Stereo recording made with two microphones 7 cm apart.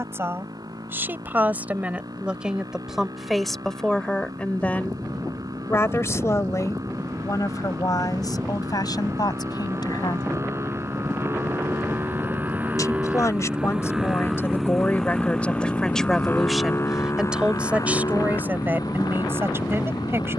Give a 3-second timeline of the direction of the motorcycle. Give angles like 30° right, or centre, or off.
60° right, 60° right, 50° right, 40° right, 10° right, 30° left, 60° left.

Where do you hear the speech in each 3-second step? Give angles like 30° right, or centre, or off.
20° right, 10° left, 50° left, 70° left, 40° left, centre, 30° right.